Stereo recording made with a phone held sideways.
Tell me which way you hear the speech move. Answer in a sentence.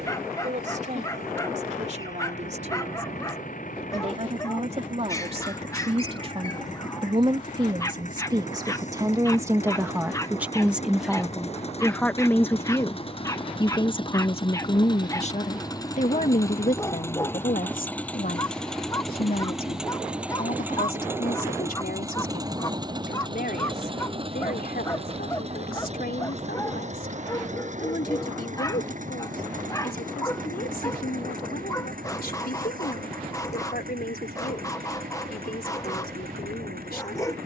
You can hear the speech travel towards the left.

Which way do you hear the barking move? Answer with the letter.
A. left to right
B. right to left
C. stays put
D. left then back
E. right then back
C.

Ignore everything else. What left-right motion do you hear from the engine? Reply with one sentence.
You can hear the engine go from the left side to the right.